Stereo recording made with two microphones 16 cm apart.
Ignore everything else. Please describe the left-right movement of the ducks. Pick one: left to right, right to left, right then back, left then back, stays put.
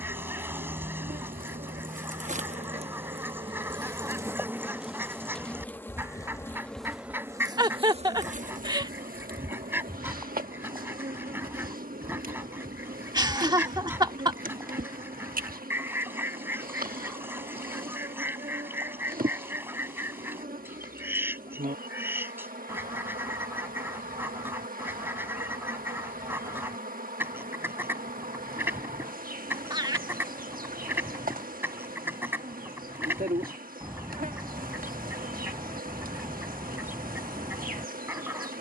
stays put.